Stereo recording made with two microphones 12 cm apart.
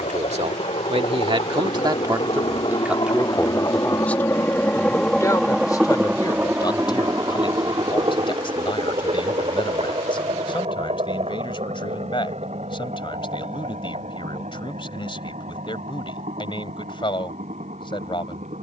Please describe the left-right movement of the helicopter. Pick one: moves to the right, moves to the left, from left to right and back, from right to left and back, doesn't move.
moves to the right.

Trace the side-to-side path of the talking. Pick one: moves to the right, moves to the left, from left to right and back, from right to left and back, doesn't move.
moves to the left.